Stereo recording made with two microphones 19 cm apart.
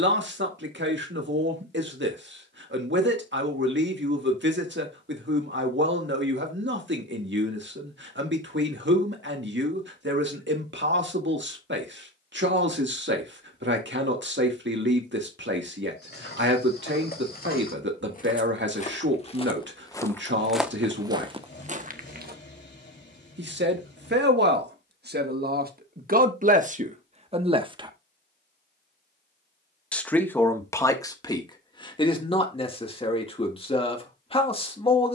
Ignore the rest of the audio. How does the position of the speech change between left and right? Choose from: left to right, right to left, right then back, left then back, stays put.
right to left.